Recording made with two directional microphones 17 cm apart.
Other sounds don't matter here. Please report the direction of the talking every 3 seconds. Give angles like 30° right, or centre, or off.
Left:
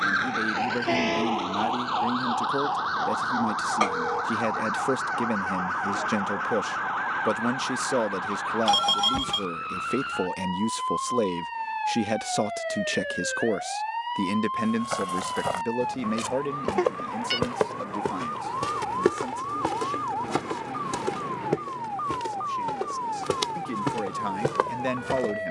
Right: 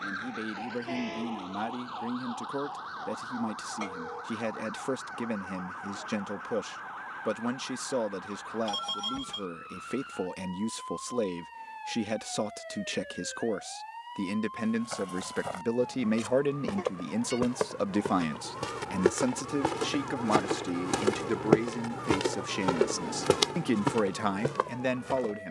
30° left, 30° left, 30° left, 30° left, 20° left, 10° right, 50° right, 60° right, centre.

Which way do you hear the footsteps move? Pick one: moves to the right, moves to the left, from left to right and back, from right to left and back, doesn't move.
from left to right and back.